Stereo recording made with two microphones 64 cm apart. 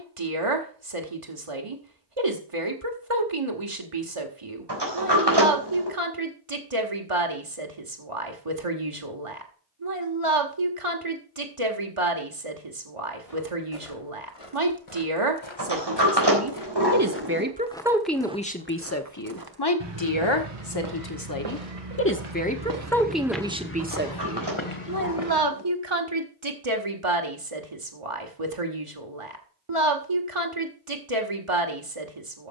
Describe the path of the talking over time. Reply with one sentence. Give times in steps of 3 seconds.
You can hear the talking on the right from 0 s, on the left from 18 s, in the centre from 21 s and on the right from 24 s.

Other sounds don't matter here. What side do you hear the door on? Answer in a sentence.
In this clip you hear the door on the right.